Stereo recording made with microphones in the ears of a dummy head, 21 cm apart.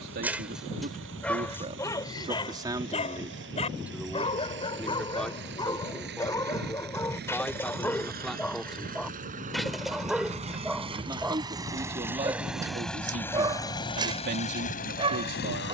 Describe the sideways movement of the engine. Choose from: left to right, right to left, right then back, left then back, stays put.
right to left.